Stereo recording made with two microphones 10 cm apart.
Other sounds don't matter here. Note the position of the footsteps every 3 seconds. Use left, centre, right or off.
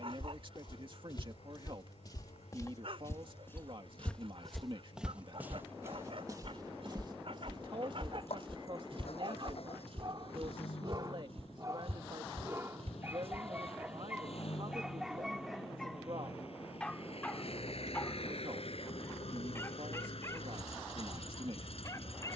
left, centre, right, right, right, off, off, off.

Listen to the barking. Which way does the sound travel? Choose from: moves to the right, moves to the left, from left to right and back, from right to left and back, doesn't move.
moves to the left.